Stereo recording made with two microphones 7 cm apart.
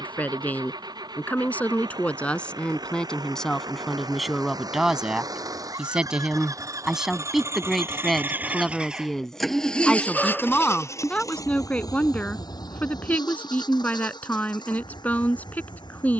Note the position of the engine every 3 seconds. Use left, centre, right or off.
right, right, right, left, left, left.